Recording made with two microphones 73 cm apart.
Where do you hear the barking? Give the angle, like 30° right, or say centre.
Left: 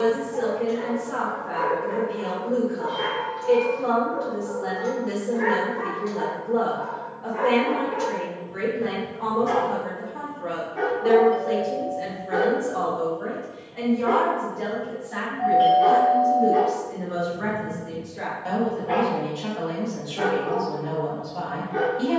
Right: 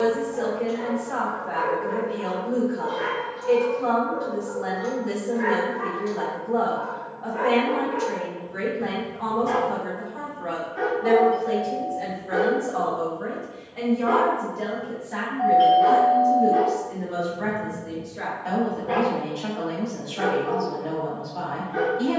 20° right.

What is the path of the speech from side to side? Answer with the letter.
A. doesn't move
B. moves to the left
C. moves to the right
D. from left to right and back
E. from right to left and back
B.